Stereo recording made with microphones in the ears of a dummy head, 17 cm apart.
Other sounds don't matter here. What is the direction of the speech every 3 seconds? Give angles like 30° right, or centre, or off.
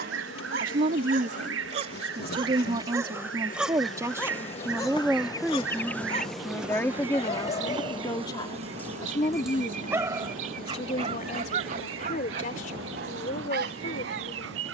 40° right, 10° right, 20° left, 30° left, 50° left.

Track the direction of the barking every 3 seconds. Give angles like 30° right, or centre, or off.
40° right, 10° left, 40° left, 30° right, 60° right.